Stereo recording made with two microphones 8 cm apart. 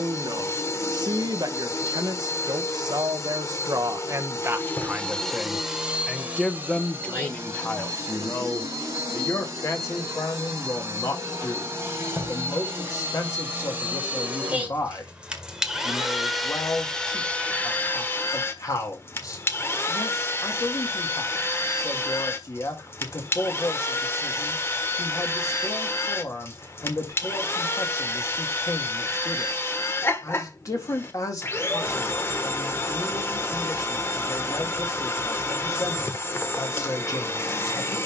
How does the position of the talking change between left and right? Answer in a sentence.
In this clip you hear the talking go from the right side to the left.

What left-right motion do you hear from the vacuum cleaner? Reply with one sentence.
In this clip you hear the vacuum cleaner move from left to right and back again.